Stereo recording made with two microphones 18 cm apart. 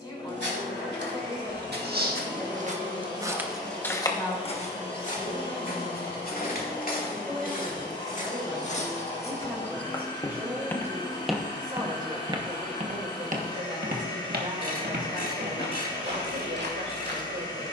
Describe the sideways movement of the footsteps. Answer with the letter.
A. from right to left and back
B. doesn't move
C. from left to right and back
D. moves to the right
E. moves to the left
A.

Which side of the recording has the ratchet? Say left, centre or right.
left.